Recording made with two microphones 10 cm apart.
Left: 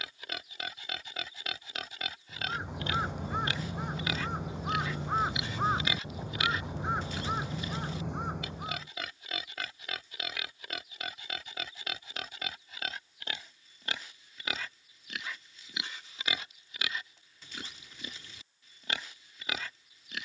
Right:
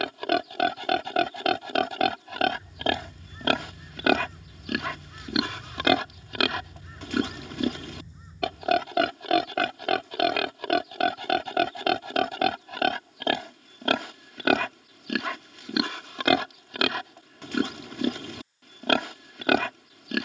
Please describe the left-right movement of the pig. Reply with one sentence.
You can hear the pig stay in one place.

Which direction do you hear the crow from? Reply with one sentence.
In this clip you hear the crow on the left.